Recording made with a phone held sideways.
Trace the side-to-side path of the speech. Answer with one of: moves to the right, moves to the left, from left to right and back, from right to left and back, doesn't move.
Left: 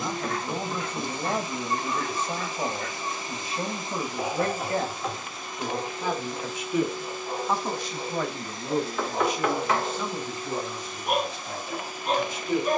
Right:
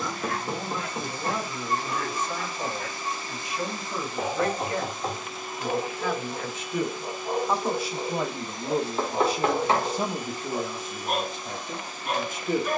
moves to the right.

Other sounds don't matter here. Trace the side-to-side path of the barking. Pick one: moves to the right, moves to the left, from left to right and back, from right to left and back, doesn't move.
moves to the left.